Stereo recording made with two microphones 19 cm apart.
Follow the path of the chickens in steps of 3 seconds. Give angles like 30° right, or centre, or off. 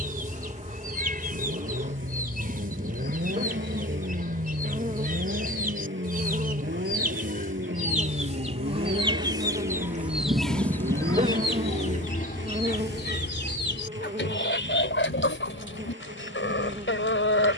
40° right, 40° right, 40° right, centre, 60° left, 80° left.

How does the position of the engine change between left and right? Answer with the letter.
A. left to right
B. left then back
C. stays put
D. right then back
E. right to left
C.